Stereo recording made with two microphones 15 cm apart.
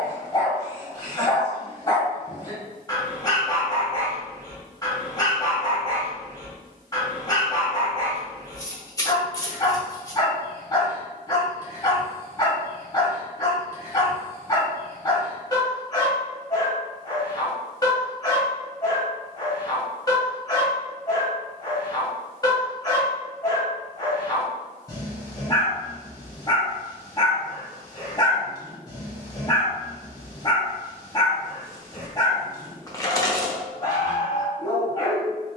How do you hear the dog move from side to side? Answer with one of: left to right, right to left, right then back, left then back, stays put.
stays put.